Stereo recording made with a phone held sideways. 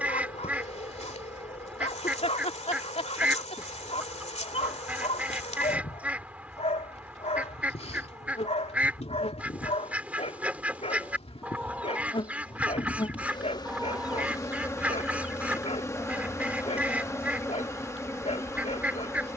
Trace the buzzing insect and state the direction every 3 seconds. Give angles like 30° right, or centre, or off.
50° left, 50° left, 50° left, 40° left, 30° left, 20° left, 20° left.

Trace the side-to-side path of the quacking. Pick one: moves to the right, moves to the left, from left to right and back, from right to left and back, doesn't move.
doesn't move.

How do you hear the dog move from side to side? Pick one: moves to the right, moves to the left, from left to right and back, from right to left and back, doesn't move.
doesn't move.